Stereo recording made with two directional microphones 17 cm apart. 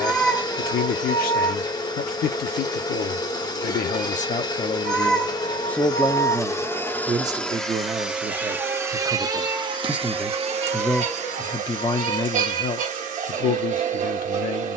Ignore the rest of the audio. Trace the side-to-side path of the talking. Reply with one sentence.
You can hear the talking go right and come back.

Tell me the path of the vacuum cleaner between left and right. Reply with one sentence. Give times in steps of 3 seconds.
You can hear the vacuum cleaner on the left from 0 s, in the centre from 6 s and on the right from 9 s.